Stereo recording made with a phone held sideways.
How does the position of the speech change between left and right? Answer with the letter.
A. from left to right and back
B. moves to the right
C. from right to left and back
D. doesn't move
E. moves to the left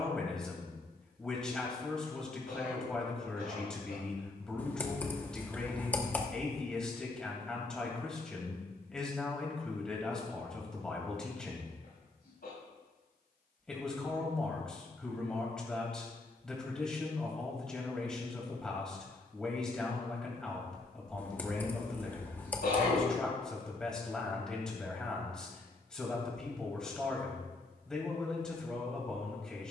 D.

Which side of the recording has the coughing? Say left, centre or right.
left.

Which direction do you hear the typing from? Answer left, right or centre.
centre.